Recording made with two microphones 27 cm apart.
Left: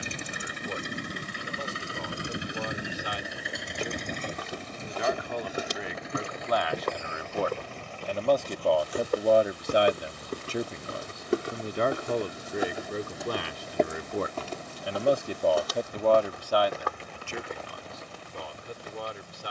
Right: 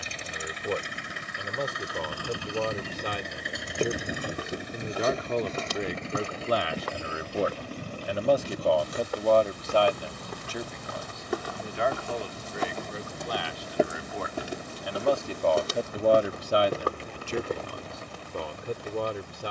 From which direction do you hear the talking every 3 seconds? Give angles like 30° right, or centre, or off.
60° right, 50° right, 20° right, 20° left, 50° left, 20° right, 60° right.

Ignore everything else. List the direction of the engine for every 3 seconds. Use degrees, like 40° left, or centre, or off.
30° left, 10° right, 40° right, 50° right, 50° right, 60° right, 60° right.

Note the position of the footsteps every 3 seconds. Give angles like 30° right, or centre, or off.
off, 10° right, 50° left, 40° left, centre, 40° right, off.